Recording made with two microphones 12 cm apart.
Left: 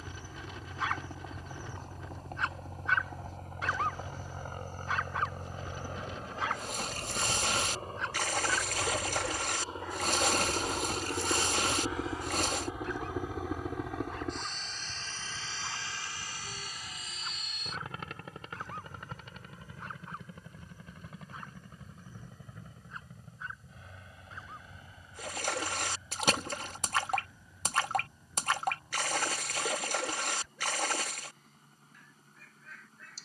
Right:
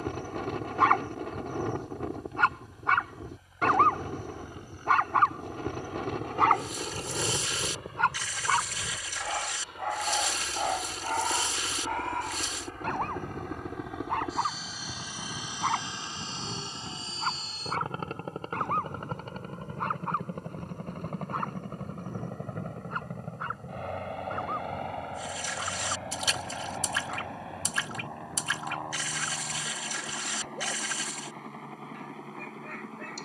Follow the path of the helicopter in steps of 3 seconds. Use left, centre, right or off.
left, left, left, left, centre, right, right, right, right, right, right.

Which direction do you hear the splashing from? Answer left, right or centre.
left.